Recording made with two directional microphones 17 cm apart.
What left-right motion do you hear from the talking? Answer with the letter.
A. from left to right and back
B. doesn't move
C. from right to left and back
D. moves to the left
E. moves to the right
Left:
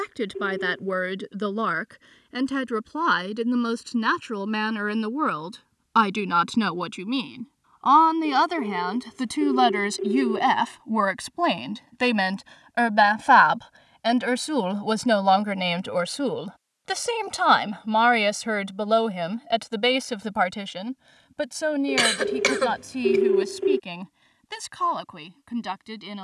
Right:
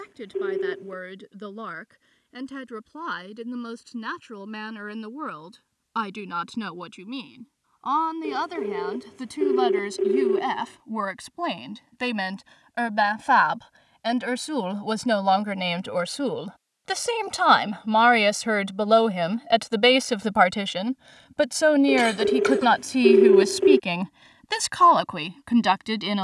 E.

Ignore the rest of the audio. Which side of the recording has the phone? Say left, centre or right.
right.